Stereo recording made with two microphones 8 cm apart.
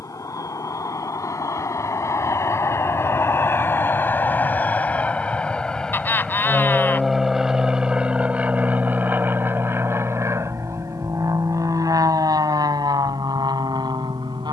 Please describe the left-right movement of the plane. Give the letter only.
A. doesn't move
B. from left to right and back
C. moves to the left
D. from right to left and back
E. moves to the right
E.